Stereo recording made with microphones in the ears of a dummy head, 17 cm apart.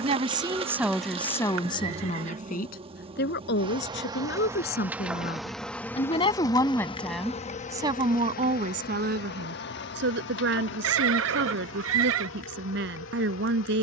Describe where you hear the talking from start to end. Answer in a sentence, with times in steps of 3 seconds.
In this clip you hear the talking in the centre from 0 s, on the left from 3 s, in the centre from 6 s and on the right from 9 s.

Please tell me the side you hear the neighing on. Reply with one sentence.
You can hear the neighing on the right.